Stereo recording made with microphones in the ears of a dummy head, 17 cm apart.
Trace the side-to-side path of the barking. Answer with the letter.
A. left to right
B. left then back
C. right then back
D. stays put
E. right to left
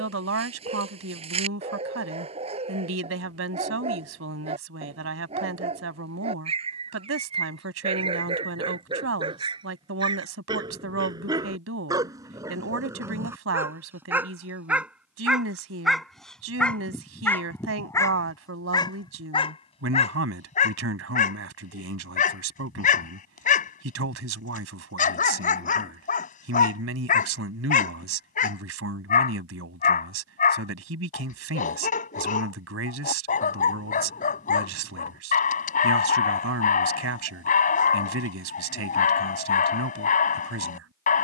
E.